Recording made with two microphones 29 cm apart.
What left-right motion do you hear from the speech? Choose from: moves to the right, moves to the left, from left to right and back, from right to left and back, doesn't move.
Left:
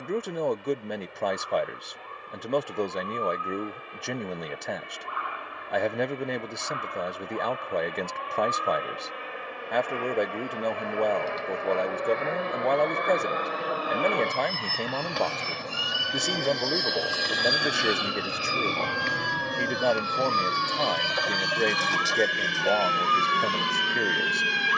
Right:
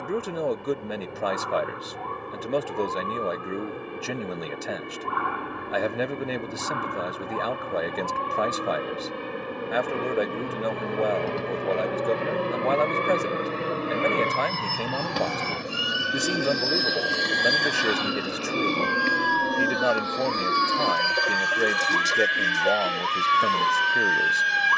doesn't move.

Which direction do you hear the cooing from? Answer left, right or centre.
right.